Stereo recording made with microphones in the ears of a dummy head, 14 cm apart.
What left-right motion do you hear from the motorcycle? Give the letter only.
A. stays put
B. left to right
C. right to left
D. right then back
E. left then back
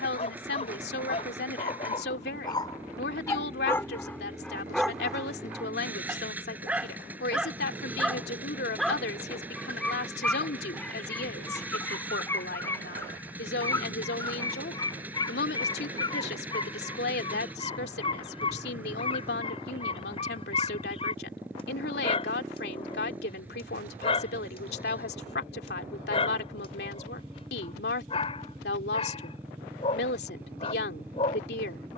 A.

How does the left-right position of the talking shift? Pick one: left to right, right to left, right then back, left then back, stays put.
stays put.